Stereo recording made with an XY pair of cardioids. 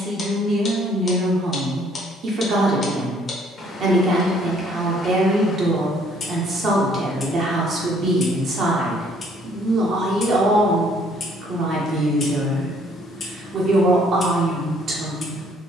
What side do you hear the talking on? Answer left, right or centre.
right.